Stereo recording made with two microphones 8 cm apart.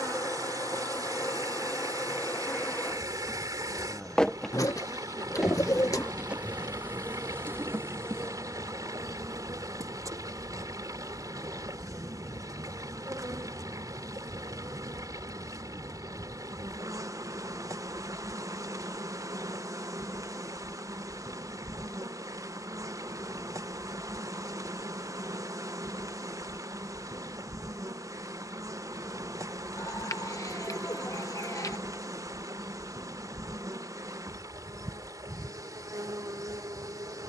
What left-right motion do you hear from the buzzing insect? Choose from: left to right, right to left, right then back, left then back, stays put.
left to right.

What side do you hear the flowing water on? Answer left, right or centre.
right.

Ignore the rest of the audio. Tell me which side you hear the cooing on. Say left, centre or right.
left.